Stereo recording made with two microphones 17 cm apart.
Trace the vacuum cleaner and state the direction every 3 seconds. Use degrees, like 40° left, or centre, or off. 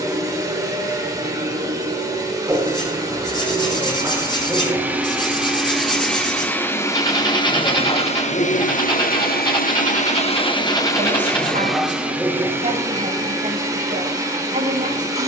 20° right, 10° right, 30° left, 30° left, 20° right.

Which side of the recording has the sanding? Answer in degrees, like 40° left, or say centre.
30° left.